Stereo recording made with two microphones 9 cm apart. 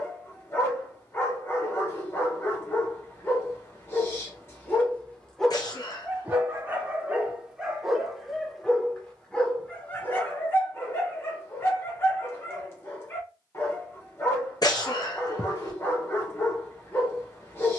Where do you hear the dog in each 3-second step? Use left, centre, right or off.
left, left, centre, left, left, left.